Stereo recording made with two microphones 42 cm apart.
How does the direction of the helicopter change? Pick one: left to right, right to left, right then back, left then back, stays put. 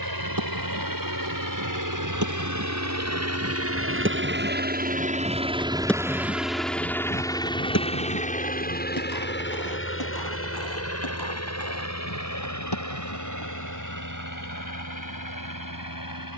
right to left.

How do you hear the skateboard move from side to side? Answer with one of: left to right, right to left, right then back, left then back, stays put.
right to left.